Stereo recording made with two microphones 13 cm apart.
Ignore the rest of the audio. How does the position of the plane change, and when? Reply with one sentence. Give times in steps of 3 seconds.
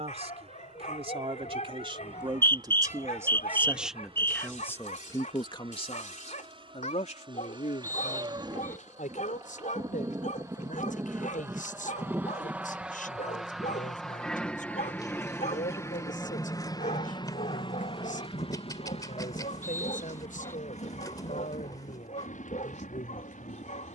In this clip you hear the plane on the right from 0 s, in the centre from 12 s and on the left from 15 s.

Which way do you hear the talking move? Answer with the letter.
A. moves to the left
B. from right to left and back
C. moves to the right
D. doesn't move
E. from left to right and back
A.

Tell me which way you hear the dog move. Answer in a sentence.
You can hear the dog stay in one place.